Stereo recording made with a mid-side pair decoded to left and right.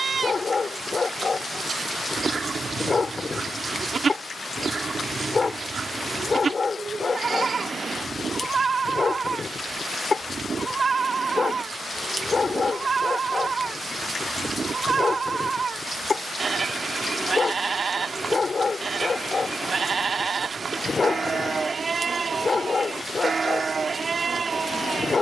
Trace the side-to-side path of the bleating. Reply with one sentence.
In this clip you hear the bleating stay put.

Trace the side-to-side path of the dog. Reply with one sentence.
In this clip you hear the dog stay in one place.